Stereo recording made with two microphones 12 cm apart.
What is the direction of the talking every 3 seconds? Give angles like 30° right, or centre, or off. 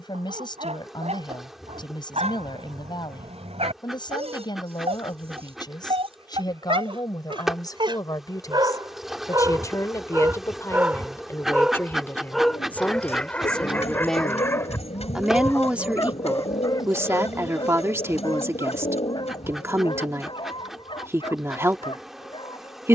40° left, 40° left, 40° left, 30° left, 10° left, 20° right, 20° right, 20° right.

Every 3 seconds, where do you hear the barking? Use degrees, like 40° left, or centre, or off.
80° right, 70° right, 50° right, 20° right, 10° left, 30° left, 50° left, 50° left.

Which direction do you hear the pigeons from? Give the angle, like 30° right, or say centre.
80° left.